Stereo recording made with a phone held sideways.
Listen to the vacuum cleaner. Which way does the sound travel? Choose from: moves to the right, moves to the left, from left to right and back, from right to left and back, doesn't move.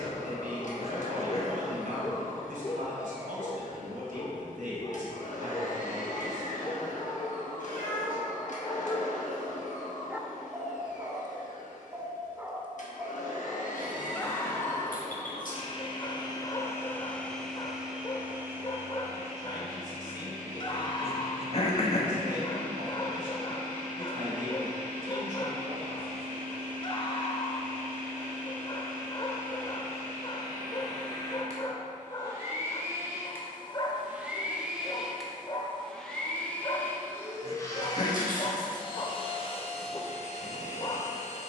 from left to right and back.